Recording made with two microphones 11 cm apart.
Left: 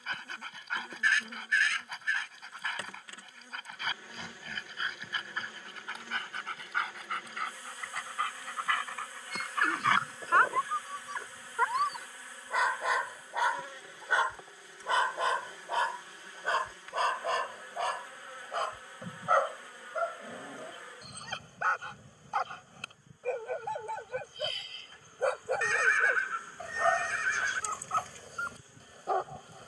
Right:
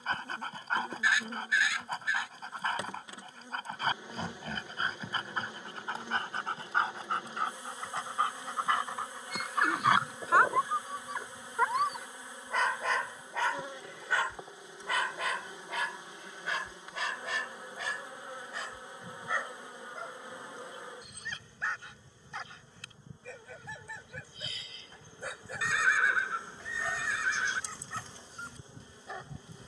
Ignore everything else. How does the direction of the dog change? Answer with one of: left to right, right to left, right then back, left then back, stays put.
right to left.